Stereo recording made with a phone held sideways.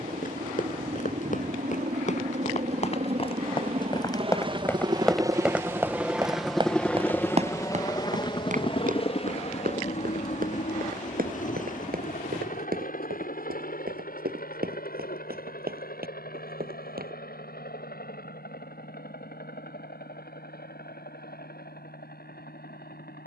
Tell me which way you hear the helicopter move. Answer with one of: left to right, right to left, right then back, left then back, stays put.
right to left.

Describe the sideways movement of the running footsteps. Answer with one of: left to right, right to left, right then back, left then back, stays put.
left to right.